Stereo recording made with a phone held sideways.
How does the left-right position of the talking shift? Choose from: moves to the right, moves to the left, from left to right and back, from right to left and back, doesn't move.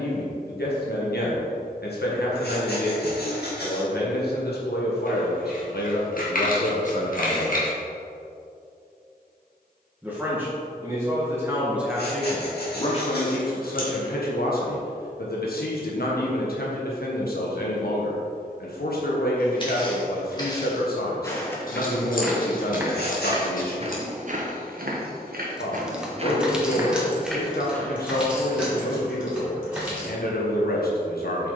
from left to right and back.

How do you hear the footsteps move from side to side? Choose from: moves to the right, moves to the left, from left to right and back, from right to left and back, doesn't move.
from left to right and back.